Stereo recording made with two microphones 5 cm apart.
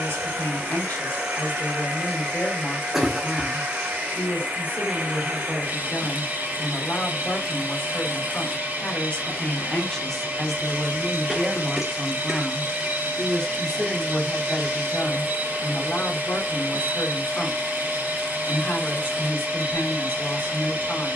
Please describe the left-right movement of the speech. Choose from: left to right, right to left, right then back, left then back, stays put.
right then back.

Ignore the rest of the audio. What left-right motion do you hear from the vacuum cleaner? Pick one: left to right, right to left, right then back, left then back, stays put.
stays put.